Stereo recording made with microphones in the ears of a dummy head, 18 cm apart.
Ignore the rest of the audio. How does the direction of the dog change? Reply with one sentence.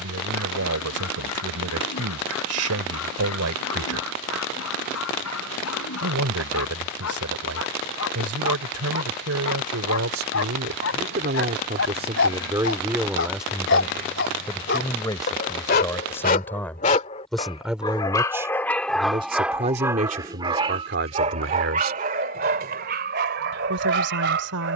You can hear the dog go from the left side to the right.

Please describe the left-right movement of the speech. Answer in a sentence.
In this clip you hear the speech move from right to left and back again.